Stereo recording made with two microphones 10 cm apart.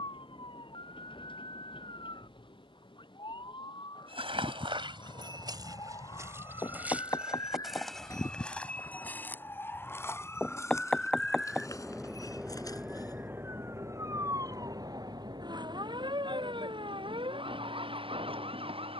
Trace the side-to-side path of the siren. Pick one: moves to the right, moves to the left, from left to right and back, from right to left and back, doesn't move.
moves to the right.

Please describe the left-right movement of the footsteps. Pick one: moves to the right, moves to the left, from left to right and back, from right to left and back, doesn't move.
moves to the left.